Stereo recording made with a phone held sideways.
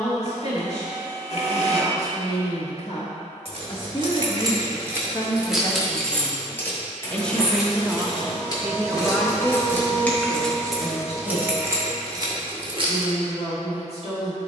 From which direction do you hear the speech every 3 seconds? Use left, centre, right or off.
left, left, centre, left, left.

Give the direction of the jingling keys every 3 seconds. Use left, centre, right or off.
off, right, left, centre, right.